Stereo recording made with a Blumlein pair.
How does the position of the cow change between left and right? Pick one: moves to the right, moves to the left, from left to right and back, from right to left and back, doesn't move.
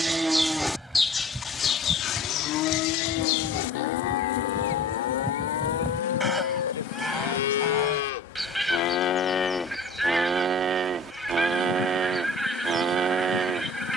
from right to left and back.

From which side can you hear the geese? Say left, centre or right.
centre.